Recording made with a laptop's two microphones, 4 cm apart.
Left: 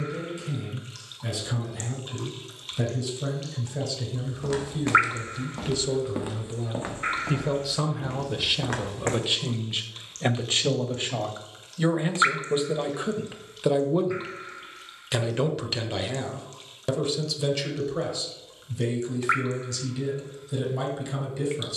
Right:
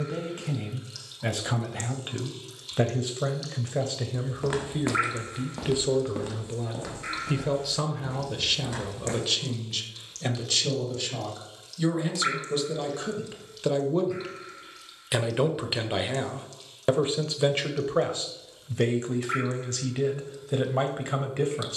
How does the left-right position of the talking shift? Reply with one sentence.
In this clip you hear the talking go left and come back.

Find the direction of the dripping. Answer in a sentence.
In this clip you hear the dripping on the left.